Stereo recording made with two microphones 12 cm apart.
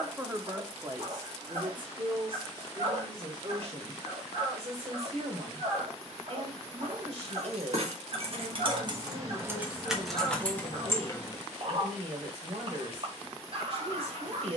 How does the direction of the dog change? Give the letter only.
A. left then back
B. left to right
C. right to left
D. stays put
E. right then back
D.